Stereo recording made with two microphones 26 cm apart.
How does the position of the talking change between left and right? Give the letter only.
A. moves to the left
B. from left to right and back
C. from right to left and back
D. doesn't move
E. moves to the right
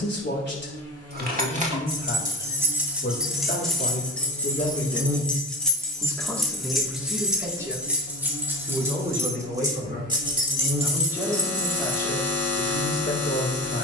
B.